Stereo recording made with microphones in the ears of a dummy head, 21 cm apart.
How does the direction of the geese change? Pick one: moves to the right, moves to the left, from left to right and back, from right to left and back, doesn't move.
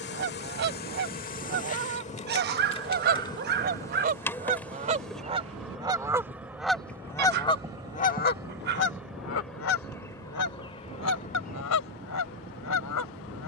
moves to the left.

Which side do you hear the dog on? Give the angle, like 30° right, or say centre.
40° right.